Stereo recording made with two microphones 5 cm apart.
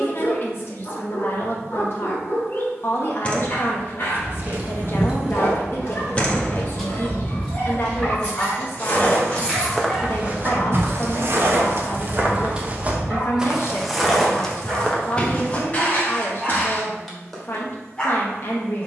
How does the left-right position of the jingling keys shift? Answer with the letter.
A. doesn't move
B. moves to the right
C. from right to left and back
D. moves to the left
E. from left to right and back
C.